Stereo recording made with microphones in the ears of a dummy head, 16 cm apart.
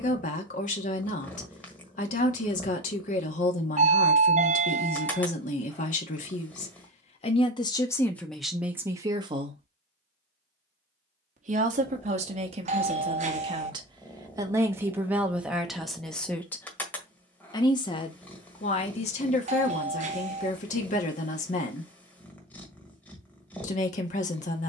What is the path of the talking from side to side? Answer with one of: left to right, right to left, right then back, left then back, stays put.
right then back.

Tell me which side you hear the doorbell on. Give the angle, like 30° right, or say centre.
40° right.